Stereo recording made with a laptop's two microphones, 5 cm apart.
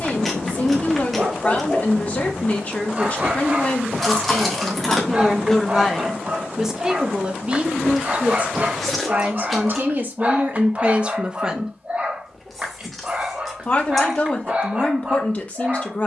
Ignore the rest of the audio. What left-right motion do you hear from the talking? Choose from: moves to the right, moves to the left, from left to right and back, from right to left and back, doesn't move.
from left to right and back.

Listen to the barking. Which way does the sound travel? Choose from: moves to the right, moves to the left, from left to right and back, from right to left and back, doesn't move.
doesn't move.